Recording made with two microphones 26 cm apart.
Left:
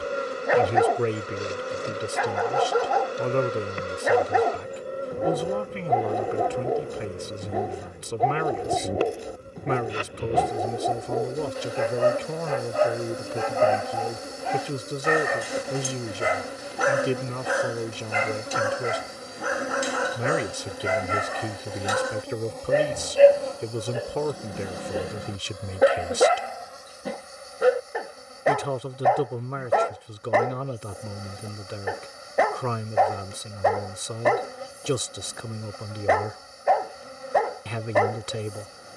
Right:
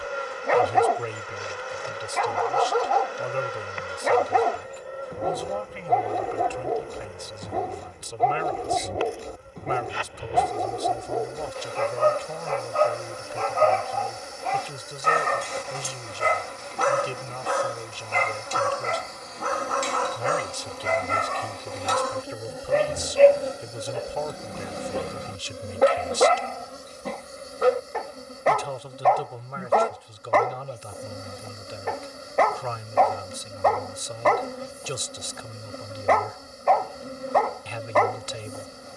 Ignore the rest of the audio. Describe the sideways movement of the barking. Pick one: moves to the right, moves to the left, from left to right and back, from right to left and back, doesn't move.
doesn't move.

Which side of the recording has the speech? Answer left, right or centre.
left.